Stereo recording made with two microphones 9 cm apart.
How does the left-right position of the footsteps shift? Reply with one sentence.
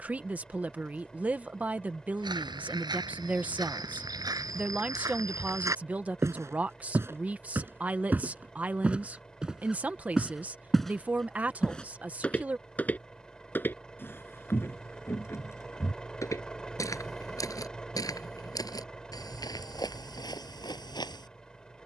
You can hear the footsteps travel towards the left.